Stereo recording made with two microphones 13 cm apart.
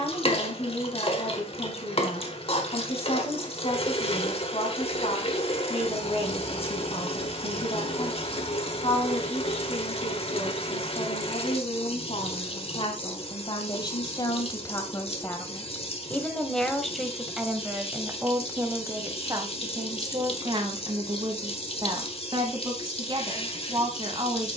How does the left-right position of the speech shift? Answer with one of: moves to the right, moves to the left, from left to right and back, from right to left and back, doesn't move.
moves to the right.